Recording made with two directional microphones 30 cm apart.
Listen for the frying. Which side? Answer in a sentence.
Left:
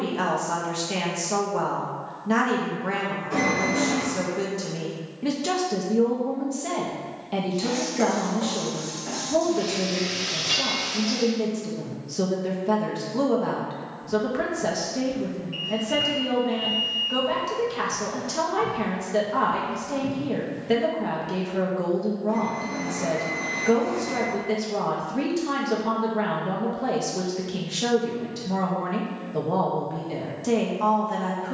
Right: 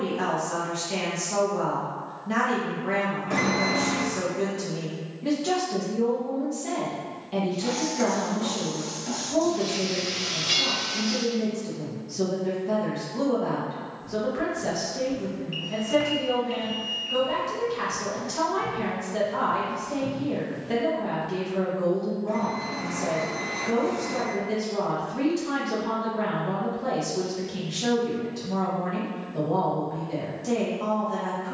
In this clip you hear the frying in the centre.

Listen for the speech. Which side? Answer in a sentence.
You can hear the speech on the left.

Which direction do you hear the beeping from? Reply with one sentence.
You can hear the beeping on the right.